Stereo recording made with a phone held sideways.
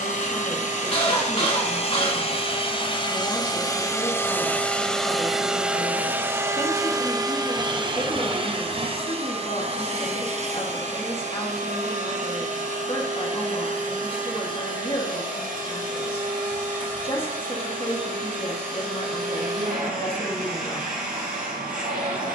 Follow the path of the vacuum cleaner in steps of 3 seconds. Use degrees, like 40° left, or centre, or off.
50° left, 10° left, 30° right, 50° right, 60° right, 60° right, 70° right, 70° right.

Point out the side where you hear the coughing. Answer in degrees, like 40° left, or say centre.
40° left.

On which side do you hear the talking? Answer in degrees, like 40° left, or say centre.
40° left.